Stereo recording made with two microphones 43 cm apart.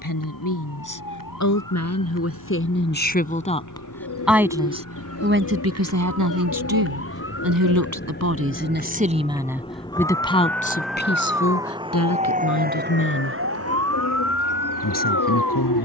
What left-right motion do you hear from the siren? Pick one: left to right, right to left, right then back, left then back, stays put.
left to right.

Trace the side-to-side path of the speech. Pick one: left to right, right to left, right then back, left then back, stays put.
right then back.